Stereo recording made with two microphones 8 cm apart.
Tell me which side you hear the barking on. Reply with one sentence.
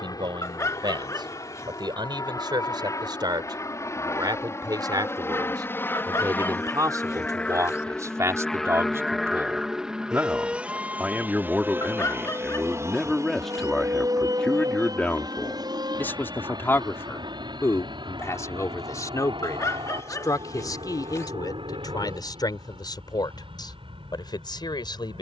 In this clip you hear the barking on the left.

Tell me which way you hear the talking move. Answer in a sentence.
You can hear the talking go from the right side to the left.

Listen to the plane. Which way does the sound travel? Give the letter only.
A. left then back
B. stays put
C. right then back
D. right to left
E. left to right
E.